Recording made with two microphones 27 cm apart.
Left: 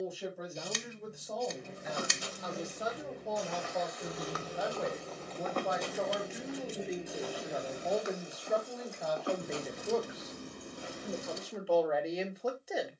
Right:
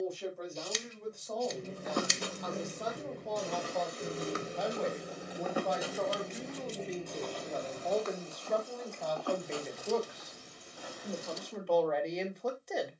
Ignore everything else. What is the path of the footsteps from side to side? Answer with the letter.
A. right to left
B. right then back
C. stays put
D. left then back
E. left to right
A.